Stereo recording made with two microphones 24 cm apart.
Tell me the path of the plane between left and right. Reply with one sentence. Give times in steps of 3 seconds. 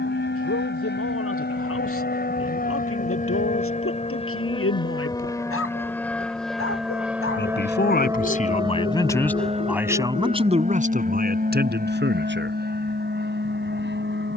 In this clip you hear the plane on the left from 0 s, in the centre from 6 s and on the right from 9 s.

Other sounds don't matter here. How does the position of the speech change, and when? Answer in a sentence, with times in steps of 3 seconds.
In this clip you hear the speech on the left from 0 s and on the right from 9 s.